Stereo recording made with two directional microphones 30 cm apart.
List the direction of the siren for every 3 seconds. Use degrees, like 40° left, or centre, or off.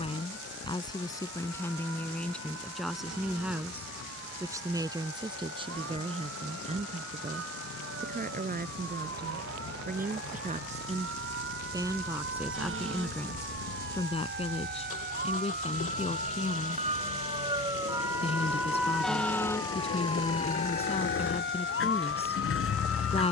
60° right, 60° right, 50° right, 50° right, 40° right, 20° right, 10° left, 40° left.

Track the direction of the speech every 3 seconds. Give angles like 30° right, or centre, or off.
10° left, 10° right, 30° right, 20° right, 10° left, 20° left, 20° left, 20° left.